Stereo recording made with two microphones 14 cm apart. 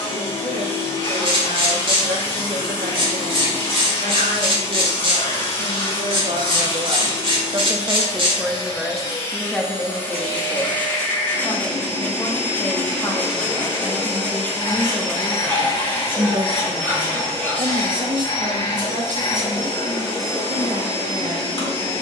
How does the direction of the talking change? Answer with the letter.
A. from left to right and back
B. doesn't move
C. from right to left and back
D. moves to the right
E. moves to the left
C.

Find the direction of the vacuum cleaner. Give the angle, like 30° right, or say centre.
40° left.